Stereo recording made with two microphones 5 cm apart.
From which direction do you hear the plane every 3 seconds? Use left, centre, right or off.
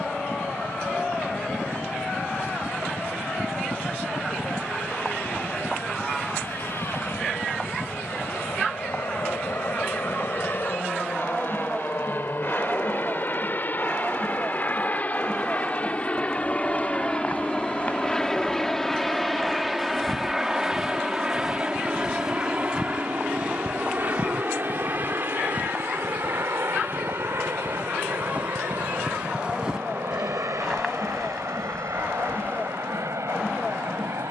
left, left, left, left, left, left, centre, right, right, right, right, right.